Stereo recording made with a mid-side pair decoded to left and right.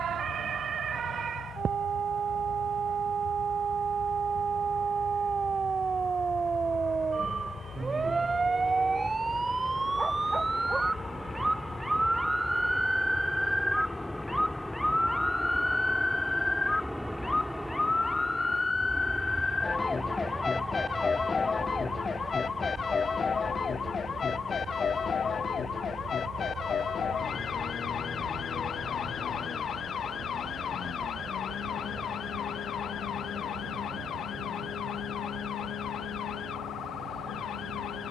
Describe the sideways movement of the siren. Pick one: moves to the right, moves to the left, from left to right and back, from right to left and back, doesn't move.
moves to the left.